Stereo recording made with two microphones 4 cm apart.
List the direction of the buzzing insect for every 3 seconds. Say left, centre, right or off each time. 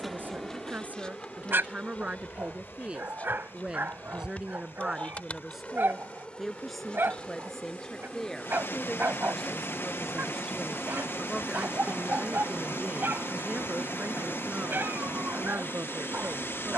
left, left, left, centre, right, right.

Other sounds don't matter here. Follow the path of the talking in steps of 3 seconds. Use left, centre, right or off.
right, centre, centre, centre, right, right.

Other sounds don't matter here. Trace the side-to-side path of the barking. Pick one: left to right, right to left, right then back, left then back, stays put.
stays put.